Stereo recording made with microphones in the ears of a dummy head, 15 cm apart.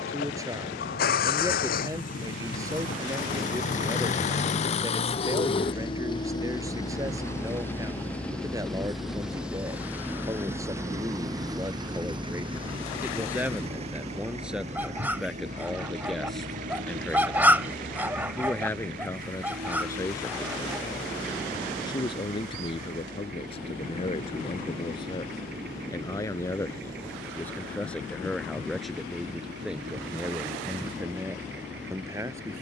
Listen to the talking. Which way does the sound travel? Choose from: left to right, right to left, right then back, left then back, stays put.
left then back.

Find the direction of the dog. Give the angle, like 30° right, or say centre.
10° right.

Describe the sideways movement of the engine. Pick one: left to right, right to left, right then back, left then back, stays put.
left to right.